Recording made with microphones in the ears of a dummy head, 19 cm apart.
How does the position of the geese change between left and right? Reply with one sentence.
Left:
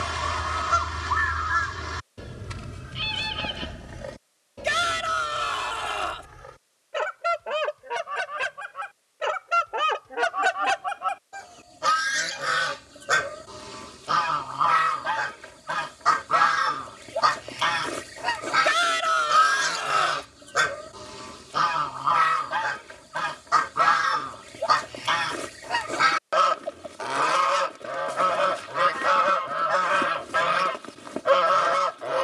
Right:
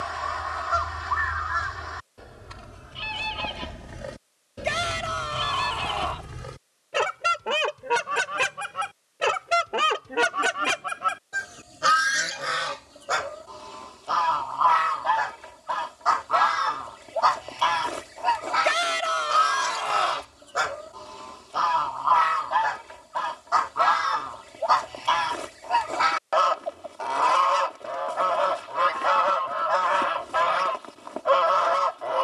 You can hear the geese move from left to right and back again.